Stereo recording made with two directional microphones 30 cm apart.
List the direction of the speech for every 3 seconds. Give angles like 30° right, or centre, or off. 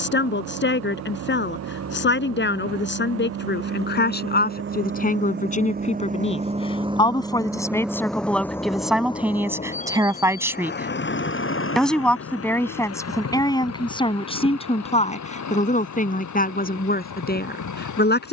40° left, 30° left, 10° left, 10° right, 10° left, 30° left.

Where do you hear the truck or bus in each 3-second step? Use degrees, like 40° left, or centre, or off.
60° right, 40° right, 10° right, 30° left, 50° left, 60° left.